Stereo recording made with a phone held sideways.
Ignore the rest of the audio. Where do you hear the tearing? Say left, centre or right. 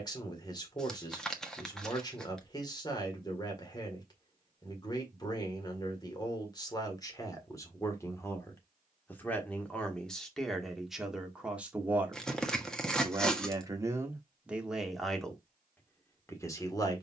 centre.